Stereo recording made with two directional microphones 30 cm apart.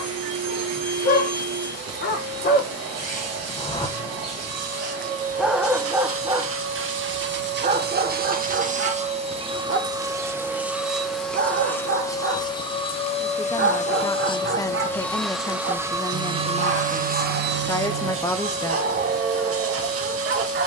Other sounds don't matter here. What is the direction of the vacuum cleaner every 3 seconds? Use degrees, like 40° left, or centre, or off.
60° right, 50° right, 40° right, 10° right, 20° left, 20° right, 50° right.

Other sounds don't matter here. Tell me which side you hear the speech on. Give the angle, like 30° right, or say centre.
10° left.